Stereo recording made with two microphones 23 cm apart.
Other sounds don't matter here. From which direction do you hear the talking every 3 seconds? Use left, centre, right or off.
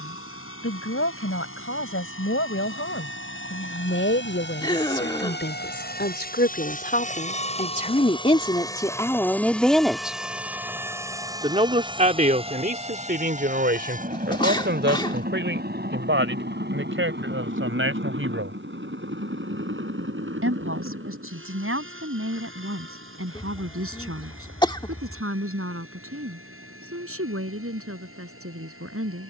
left, left, left, centre, right, right, right, right, right, right.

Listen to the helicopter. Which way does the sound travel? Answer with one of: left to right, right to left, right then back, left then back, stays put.
left to right.